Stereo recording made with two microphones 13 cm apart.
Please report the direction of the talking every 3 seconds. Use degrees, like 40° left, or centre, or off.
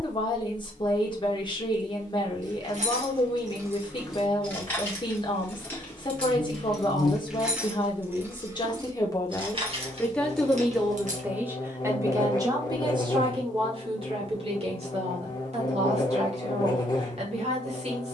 40° left, 40° left, 40° left, centre, 40° right, 50° right.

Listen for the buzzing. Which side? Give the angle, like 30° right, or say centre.
30° left.